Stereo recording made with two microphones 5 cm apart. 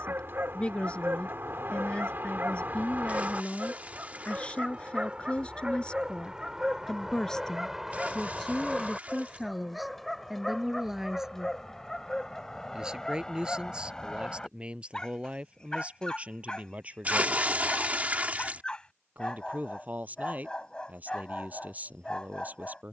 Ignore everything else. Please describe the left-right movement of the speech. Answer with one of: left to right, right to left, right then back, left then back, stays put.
left to right.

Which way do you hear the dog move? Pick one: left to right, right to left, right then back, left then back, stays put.
right to left.